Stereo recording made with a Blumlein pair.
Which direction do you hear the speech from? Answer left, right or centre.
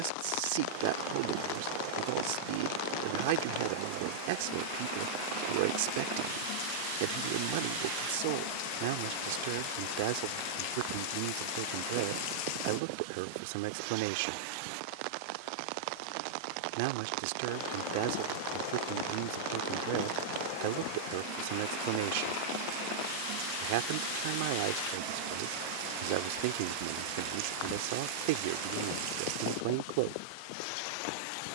right.